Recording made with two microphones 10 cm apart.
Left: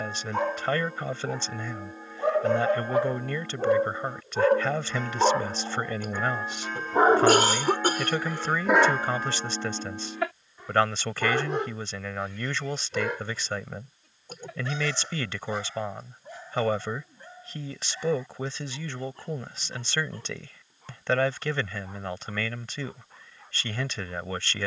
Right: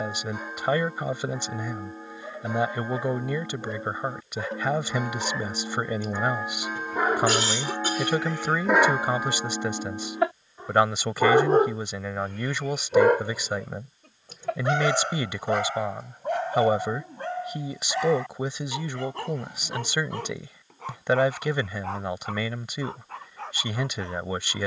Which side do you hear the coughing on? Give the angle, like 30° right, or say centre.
50° left.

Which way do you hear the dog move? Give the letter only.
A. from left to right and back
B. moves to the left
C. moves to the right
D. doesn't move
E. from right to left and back
C.